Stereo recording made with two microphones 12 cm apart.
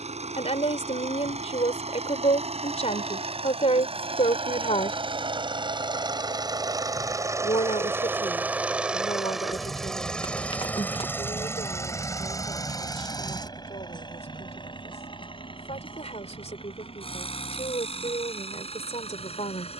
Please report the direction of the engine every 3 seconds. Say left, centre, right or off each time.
right, right, right, centre, left, left, left.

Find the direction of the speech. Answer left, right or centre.
left.